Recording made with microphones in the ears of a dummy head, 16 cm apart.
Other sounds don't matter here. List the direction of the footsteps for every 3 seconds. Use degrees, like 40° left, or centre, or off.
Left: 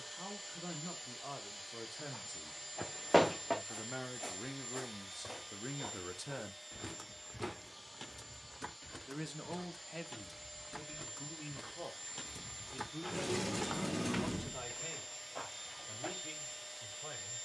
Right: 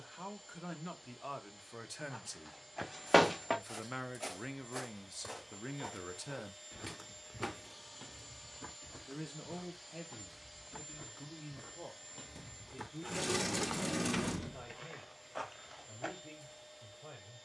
50° right, 30° right, 30° left, 70° left, 10° left, 40° right.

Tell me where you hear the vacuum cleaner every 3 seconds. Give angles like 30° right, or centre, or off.
60° left, 50° left, centre, 10° left, 40° left, 50° left.